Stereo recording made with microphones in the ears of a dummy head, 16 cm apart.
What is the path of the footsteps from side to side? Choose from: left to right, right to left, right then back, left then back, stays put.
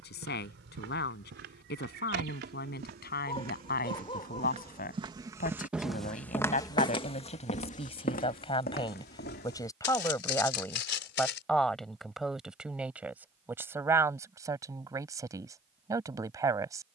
right to left.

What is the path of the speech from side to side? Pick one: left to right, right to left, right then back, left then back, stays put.
left to right.